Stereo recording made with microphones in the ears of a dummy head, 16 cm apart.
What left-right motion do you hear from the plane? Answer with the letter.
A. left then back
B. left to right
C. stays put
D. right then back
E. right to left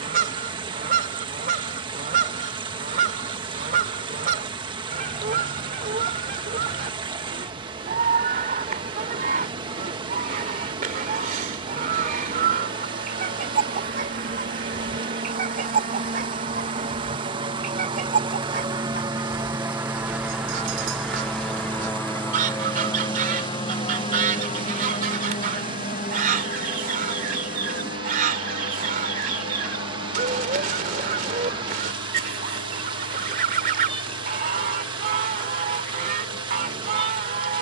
E.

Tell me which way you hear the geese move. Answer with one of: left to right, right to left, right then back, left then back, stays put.
stays put.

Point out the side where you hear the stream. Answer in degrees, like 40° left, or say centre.
30° right.